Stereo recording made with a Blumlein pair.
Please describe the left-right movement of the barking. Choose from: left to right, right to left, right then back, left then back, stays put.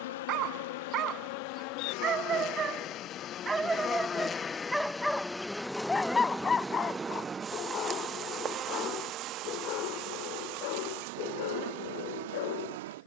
right to left.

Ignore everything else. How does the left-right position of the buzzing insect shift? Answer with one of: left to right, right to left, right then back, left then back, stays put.
left to right.